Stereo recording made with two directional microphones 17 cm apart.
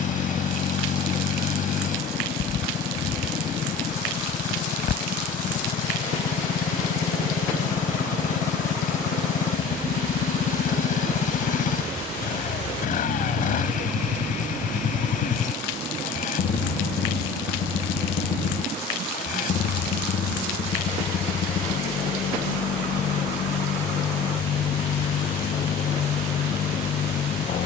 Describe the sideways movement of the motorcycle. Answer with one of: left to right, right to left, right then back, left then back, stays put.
stays put.